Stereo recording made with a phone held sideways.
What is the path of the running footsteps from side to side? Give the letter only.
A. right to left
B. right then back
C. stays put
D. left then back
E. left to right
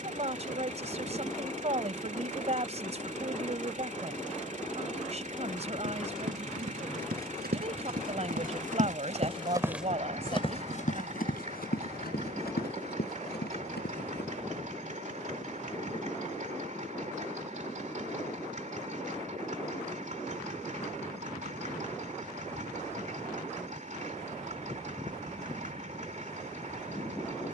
A.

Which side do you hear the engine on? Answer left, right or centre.
right.